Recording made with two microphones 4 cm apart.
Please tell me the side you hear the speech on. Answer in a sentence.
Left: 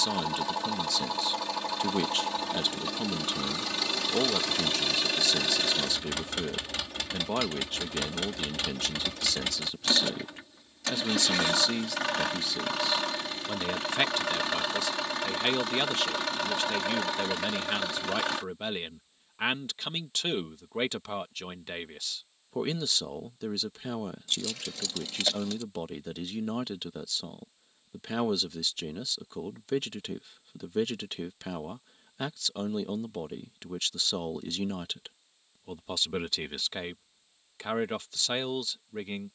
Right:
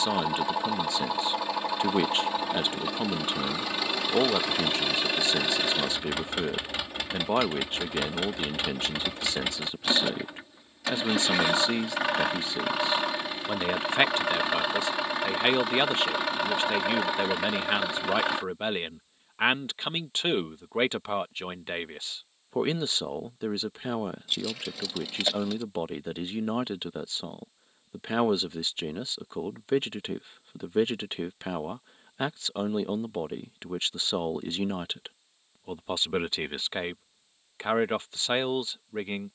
In this clip you hear the speech on the right.